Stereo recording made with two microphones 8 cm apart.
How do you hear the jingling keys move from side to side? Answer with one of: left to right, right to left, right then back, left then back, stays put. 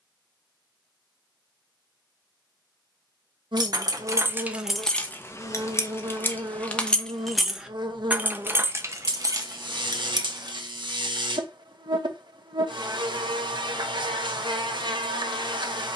left then back.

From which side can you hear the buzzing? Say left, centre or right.
right.